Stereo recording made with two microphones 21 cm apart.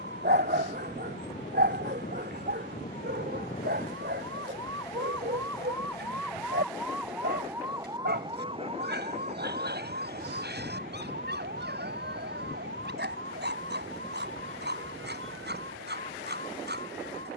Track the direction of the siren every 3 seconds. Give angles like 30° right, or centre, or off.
50° left, 30° left, 10° right, 50° right, 70° right, 70° right.